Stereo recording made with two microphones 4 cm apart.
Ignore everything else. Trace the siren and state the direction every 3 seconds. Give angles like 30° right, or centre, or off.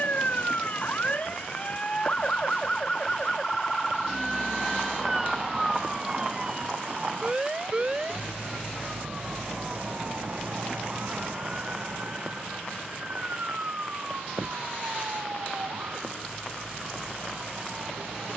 30° left, centre, 20° right, 40° right, 40° right, 50° right.